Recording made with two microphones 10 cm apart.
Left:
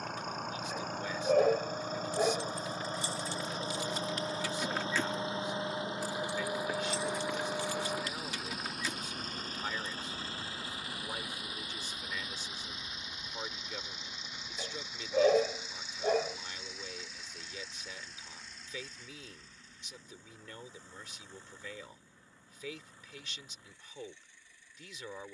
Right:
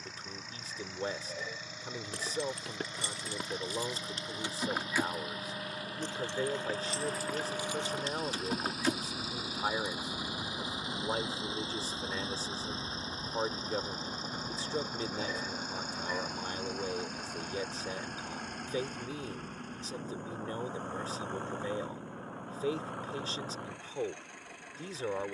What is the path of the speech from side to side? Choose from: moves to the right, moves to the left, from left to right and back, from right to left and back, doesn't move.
doesn't move.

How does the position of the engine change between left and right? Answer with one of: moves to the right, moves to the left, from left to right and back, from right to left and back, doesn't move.
moves to the right.